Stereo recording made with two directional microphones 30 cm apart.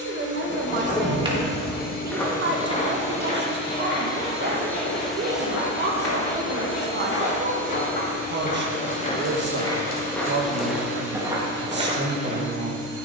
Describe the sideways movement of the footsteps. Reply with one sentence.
You can hear the footsteps move from right to left and back again.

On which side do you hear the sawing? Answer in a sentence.
You can hear the sawing on the left.